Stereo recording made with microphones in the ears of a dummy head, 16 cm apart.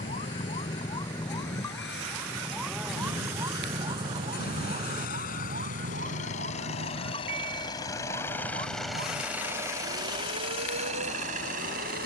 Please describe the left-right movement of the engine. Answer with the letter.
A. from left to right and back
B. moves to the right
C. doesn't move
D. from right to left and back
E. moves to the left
B.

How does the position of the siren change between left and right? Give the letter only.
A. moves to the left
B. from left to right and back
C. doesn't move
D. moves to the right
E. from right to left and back
D.